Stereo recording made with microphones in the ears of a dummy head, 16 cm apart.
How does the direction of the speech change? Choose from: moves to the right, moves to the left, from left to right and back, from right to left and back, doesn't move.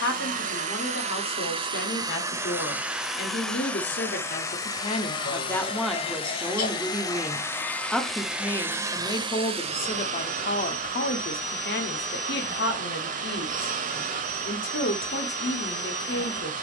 from left to right and back.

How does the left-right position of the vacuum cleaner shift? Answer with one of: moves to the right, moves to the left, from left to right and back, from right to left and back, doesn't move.
from right to left and back.